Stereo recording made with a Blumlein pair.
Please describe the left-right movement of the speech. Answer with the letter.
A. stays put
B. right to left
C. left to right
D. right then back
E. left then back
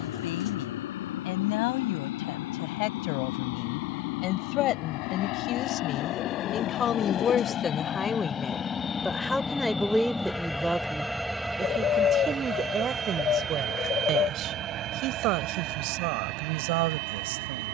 C.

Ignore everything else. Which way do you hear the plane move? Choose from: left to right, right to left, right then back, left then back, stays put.
left to right.